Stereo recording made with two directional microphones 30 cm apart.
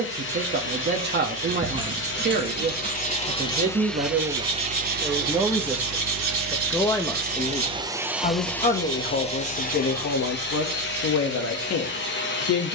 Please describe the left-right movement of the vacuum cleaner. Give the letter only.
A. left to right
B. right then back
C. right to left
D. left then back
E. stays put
B.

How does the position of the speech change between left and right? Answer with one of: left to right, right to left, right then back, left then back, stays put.
right to left.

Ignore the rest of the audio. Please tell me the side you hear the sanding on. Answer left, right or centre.
right.